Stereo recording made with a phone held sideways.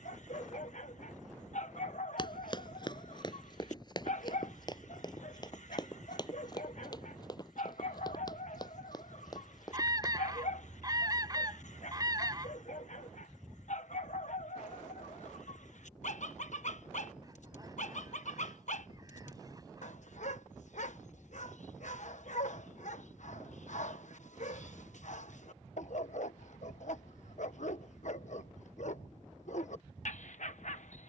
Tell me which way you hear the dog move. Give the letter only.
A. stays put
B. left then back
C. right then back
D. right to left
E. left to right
A.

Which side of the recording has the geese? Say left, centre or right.
right.